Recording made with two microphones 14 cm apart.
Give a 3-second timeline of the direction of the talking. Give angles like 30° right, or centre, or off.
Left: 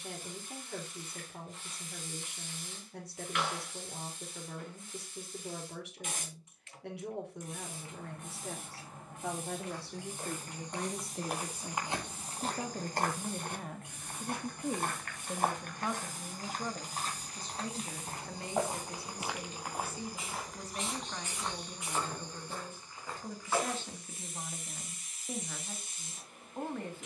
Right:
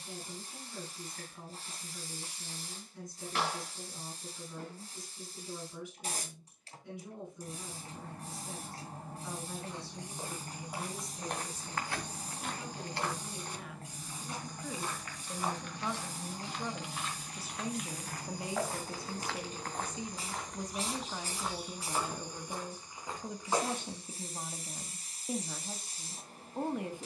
80° left, 80° left, 80° left, 60° left, 40° left, centre, 20° right, 20° right, 20° right.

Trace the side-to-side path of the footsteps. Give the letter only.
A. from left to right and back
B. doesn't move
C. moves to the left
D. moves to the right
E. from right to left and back
E.